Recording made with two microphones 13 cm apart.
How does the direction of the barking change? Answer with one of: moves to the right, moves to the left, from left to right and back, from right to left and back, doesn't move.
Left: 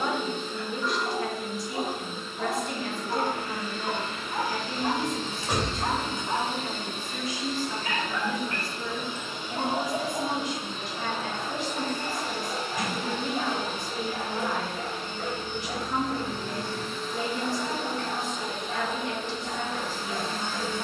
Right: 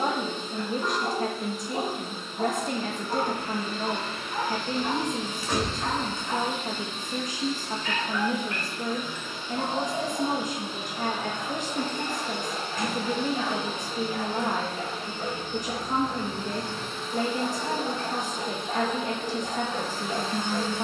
from right to left and back.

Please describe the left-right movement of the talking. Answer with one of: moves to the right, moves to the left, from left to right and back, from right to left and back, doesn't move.
doesn't move.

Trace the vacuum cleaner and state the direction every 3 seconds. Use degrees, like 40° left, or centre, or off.
30° right, 20° right, 40° left, centre, 30° right, 30° right, 30° right.